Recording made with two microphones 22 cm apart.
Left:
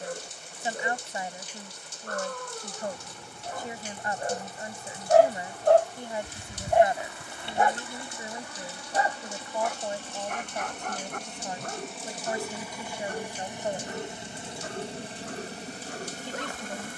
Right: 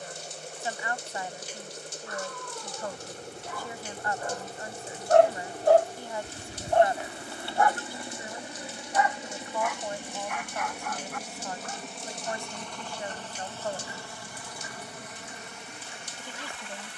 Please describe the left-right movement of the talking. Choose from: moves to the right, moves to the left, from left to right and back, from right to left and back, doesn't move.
doesn't move.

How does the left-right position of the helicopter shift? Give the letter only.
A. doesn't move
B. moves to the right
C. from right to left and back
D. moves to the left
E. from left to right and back
D.